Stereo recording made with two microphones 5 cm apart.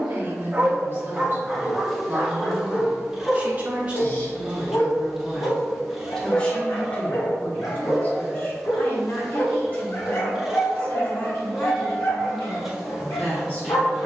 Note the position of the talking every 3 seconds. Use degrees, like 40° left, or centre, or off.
40° right, 10° right, 30° left, 40° left, 40° left.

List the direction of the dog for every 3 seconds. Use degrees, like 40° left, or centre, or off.
centre, 50° left, 60° left, 60° left, 60° left.